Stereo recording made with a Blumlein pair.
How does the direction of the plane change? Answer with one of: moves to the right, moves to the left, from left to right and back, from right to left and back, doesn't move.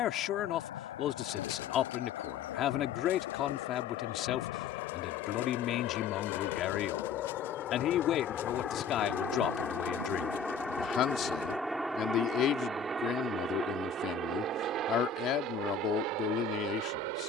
moves to the right.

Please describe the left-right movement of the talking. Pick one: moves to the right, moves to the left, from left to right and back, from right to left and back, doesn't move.
doesn't move.